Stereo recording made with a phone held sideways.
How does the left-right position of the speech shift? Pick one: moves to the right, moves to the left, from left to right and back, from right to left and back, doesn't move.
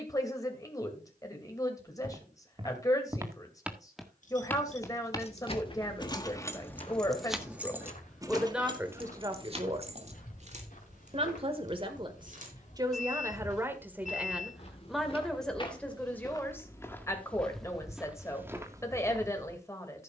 from left to right and back.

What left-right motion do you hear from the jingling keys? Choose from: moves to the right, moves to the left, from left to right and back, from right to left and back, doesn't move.
moves to the right.